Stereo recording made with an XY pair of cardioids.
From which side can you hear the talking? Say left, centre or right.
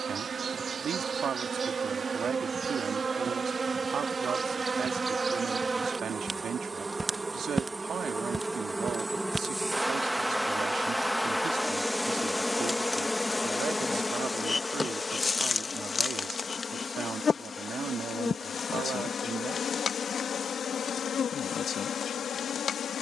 right.